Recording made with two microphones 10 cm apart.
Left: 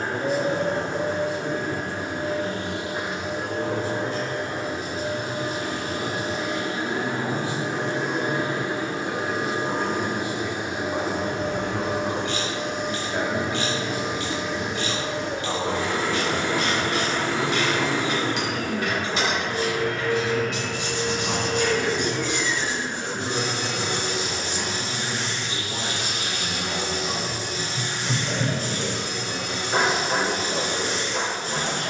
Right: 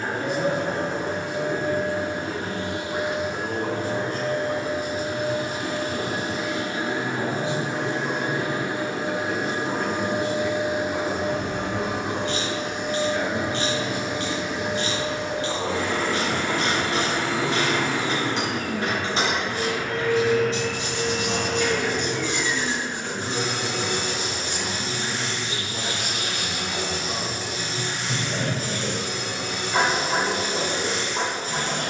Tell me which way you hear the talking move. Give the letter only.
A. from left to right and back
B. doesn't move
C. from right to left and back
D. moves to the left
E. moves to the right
D.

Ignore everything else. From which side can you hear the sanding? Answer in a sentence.
In this clip you hear the sanding on the left.